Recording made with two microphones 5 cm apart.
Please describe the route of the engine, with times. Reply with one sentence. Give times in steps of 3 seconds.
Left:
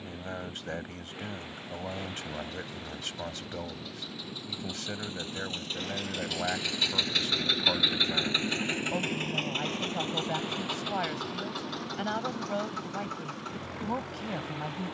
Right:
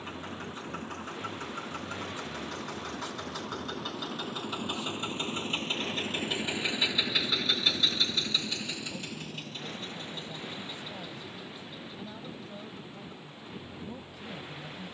In this clip you hear the engine on the right from 0 s, in the centre from 6 s and on the left from 9 s.